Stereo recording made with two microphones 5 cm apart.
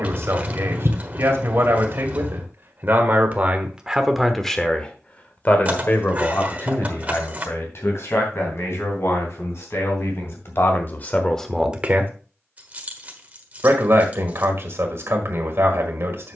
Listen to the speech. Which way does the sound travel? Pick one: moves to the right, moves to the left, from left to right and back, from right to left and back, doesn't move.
from right to left and back.